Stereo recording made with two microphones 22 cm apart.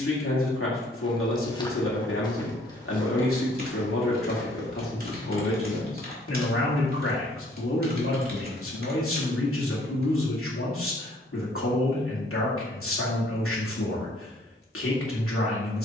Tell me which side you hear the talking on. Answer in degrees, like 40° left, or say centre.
80° left.